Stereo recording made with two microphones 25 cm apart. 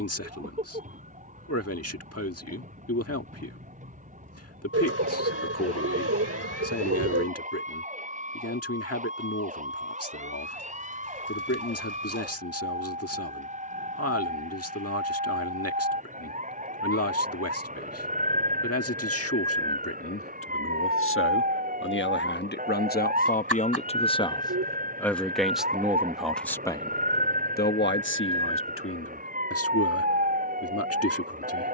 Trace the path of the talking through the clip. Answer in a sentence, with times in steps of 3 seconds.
You can hear the talking on the left from 0 s, in the centre from 24 s and on the left from 27 s.